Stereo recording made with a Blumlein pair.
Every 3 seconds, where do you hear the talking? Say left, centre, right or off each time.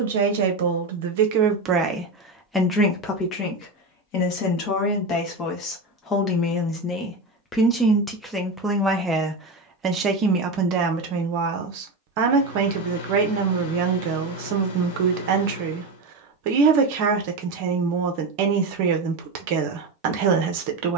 right, left, centre, right, right, right, right.